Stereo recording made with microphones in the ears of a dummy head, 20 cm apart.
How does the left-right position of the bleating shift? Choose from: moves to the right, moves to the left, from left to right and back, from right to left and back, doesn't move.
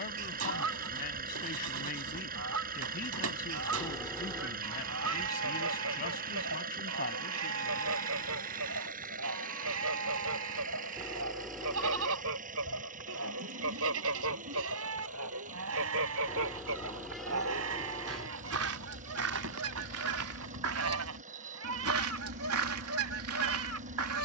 doesn't move.